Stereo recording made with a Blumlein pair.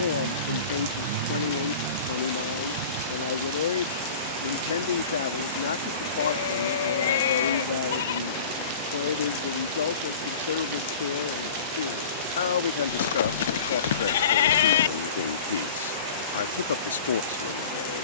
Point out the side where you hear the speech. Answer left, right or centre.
left.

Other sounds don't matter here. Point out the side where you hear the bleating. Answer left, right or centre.
left.